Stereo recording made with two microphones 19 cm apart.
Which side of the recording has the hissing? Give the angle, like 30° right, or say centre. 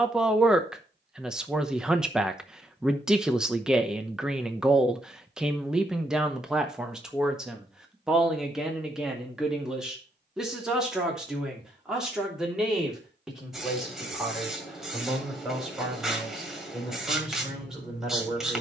centre.